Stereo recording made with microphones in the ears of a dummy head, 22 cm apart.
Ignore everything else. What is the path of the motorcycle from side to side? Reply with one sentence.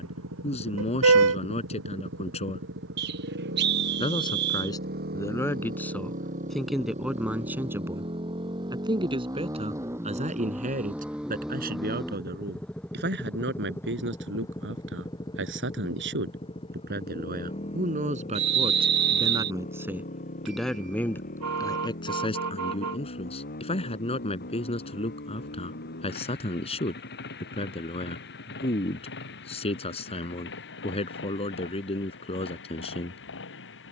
You can hear the motorcycle move from right to left.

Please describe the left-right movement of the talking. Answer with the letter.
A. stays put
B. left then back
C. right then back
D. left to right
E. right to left
C.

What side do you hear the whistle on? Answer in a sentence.
In this clip you hear the whistle on the right.